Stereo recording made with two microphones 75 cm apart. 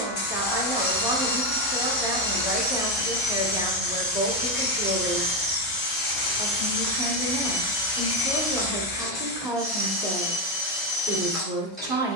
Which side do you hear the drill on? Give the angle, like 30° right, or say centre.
centre.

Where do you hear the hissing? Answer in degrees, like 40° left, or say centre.
40° left.